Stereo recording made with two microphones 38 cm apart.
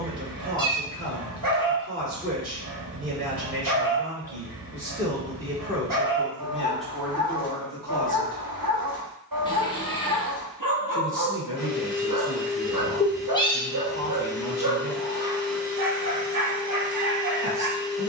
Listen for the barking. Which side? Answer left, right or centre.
right.